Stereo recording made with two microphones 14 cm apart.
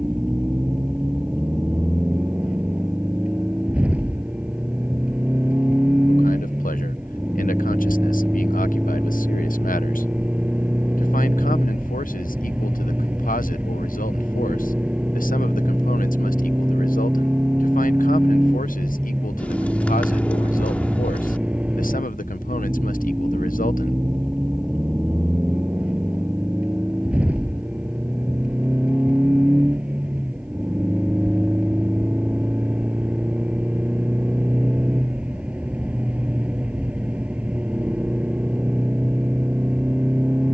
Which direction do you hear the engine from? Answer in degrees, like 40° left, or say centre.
10° right.